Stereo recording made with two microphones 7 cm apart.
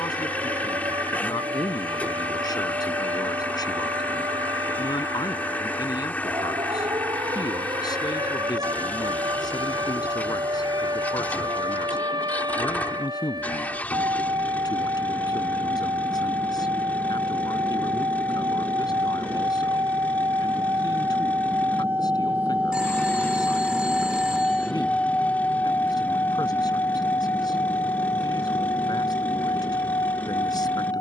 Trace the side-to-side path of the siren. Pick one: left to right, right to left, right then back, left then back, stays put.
right to left.